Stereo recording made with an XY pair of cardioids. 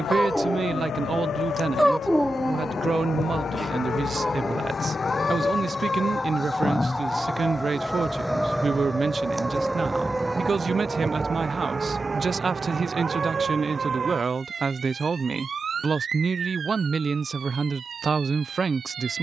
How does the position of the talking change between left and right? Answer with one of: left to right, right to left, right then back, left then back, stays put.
stays put.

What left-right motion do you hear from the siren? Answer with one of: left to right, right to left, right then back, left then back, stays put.
left to right.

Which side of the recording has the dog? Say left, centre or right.
centre.